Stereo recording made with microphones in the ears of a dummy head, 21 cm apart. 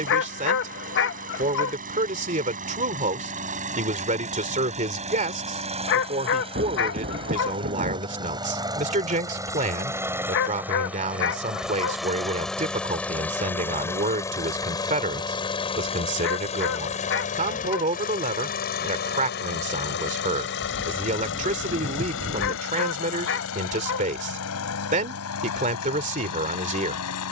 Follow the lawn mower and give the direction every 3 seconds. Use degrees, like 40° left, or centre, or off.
40° right, 30° right, 20° right, 10° right, 10° left, 30° left, 50° left, 60° left, 70° left.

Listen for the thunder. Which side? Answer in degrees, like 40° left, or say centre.
40° right.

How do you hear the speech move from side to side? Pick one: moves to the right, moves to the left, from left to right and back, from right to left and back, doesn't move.
doesn't move.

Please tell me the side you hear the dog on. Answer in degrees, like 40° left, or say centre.
50° left.